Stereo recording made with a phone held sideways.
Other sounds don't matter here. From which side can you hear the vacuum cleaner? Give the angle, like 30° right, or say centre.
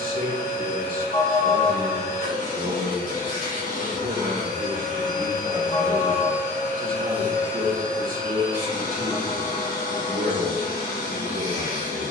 80° left.